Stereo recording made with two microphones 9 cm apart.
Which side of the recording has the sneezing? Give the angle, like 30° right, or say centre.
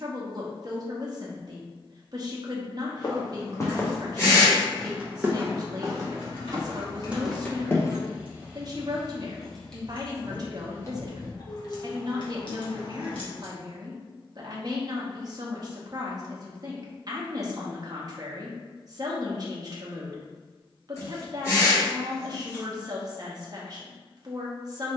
30° left.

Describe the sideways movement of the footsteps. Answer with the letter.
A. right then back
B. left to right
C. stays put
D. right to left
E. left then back
A.